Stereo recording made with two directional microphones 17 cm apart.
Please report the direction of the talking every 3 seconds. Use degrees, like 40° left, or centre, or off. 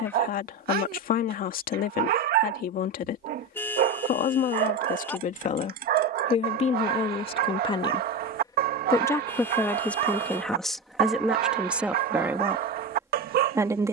60° left, 50° left, 30° left, centre, 10° right.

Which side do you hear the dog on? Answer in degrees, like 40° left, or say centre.
60° right.